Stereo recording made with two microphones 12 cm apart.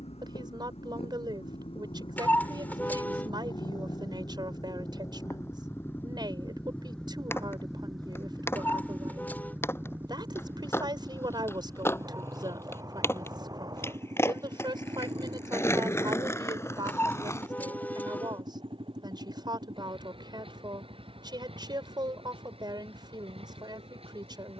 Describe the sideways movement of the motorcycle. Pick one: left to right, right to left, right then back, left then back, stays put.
left to right.